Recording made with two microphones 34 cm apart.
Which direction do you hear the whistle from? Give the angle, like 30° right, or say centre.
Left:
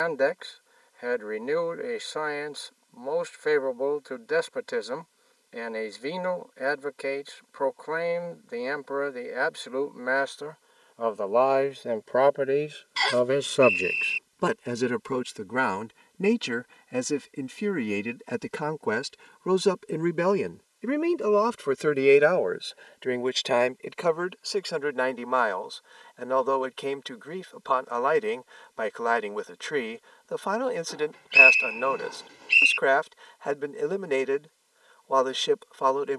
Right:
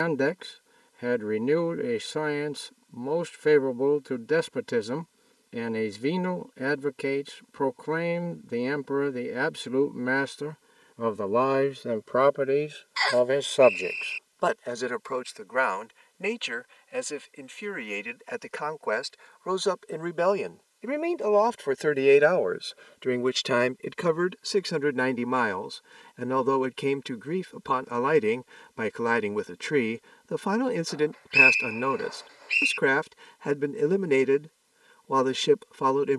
50° left.